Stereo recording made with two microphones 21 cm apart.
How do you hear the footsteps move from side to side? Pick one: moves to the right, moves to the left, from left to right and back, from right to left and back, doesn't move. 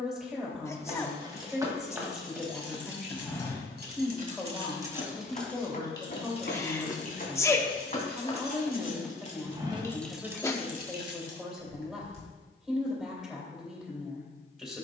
from right to left and back.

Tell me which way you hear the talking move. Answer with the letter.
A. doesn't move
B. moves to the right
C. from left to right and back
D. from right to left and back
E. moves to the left
A.